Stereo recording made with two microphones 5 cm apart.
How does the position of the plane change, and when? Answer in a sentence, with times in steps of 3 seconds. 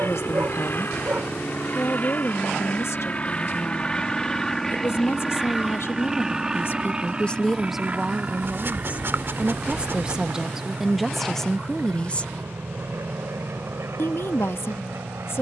In this clip you hear the plane on the left from 0 s, in the centre from 3 s and on the right from 6 s.